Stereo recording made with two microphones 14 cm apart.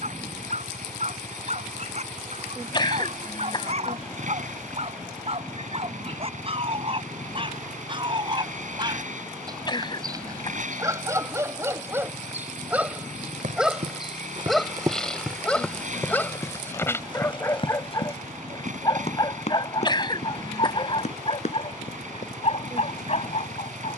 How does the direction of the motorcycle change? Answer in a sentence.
In this clip you hear the motorcycle stay put.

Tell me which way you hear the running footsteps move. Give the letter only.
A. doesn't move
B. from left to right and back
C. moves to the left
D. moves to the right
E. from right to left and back
C.